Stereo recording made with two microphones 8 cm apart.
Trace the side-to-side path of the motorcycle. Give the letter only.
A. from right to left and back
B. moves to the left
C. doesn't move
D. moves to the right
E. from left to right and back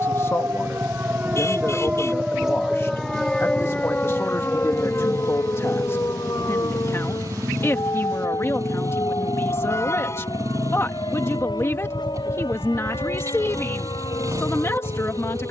C.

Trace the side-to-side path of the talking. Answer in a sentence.
In this clip you hear the talking stay put.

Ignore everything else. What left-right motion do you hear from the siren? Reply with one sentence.
You can hear the siren move from right to left.